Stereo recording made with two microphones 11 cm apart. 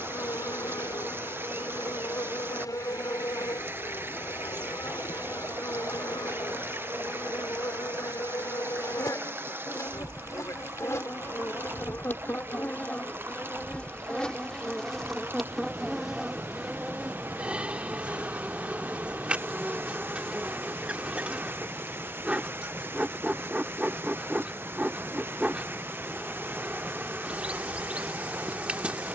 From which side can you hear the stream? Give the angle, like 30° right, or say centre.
20° right.